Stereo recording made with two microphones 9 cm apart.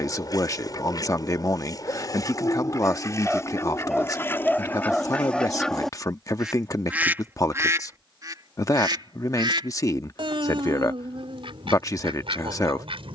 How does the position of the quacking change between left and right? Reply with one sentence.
You can hear the quacking travel towards the right.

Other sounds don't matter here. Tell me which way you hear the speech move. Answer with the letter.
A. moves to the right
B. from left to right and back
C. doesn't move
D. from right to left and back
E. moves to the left
C.